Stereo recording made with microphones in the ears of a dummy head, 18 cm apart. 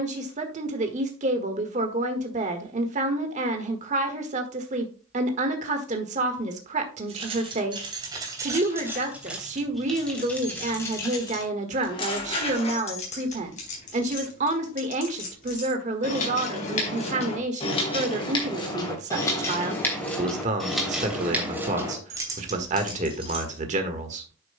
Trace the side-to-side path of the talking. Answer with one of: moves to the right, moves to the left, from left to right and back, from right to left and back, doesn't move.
doesn't move.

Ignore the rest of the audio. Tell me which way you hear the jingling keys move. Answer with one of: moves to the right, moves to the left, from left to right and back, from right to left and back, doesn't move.
from right to left and back.